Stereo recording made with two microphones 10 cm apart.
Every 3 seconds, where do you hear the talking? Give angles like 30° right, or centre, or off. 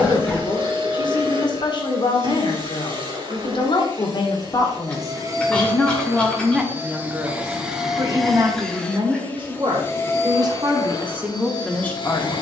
40° left, 30° left, 20° right, 30° right.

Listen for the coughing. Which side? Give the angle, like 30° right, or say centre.
10° left.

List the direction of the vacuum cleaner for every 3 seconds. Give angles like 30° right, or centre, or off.
50° right, 40° right, 10° right, 30° left.